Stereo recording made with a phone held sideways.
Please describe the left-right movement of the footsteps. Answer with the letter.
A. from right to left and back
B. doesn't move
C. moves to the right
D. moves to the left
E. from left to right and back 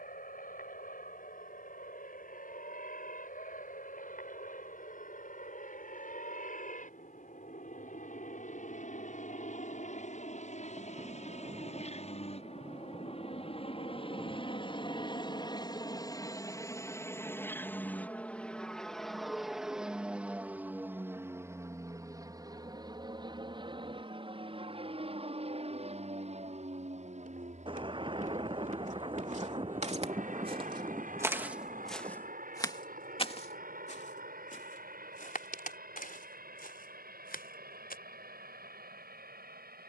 D.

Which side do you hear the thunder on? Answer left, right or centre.
right.